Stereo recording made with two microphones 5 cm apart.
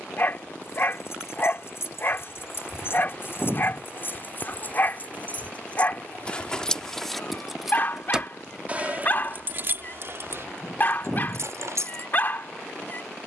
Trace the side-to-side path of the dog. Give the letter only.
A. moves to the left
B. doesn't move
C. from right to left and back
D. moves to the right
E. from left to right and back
B.